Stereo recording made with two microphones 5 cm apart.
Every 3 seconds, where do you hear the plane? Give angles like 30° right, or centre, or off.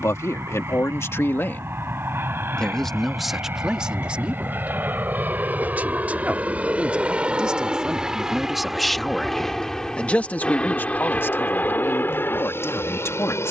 50° right, 40° right, 20° right, 20° left, 40° left.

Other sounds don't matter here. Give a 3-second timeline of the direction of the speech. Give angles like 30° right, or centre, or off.
40° left, 20° right, 20° right, 30° left, 60° left.